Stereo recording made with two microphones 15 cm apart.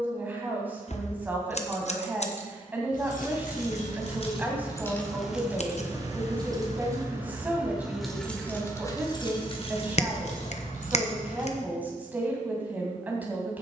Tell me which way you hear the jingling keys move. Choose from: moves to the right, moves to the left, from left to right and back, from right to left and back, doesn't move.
from left to right and back.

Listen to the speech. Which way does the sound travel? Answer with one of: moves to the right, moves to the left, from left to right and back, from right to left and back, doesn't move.
doesn't move.